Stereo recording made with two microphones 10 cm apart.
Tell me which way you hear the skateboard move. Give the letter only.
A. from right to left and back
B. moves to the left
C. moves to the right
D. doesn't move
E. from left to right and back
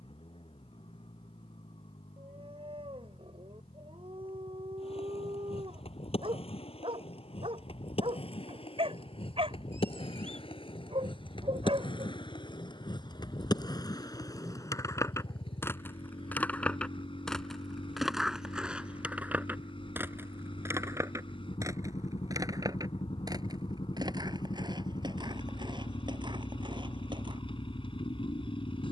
C.